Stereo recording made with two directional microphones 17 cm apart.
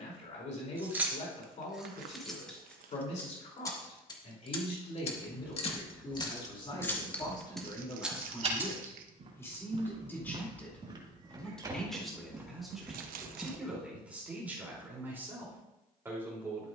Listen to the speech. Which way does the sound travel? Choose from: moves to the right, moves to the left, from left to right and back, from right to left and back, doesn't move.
moves to the right.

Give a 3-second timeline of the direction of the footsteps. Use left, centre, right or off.
off, centre, right, right, centre, off.